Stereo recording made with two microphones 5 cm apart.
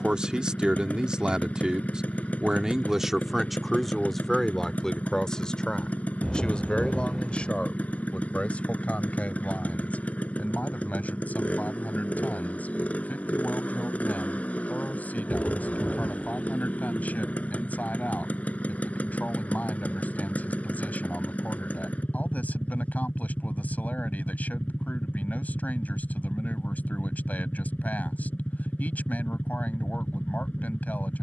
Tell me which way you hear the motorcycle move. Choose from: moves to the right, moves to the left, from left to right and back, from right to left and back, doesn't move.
doesn't move.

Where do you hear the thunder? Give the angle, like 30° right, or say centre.
centre.